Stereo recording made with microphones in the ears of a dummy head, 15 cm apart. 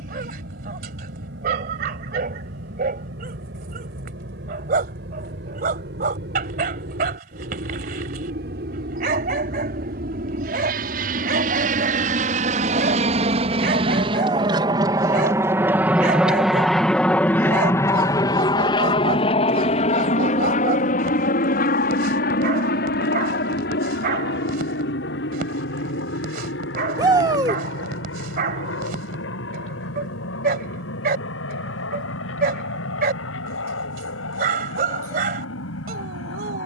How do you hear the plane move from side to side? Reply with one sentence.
In this clip you hear the plane move to the left.